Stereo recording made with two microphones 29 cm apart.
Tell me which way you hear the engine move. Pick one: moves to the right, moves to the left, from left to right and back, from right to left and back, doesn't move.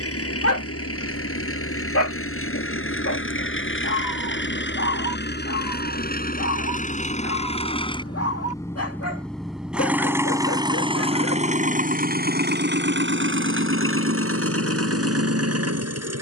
moves to the right.